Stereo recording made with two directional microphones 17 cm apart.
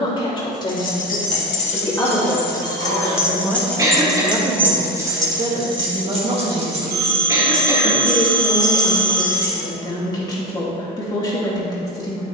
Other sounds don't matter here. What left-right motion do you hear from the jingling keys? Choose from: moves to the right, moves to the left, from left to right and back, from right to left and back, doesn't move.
moves to the right.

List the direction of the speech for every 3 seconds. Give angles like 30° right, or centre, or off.
20° left, 20° right, 10° right, 20° left.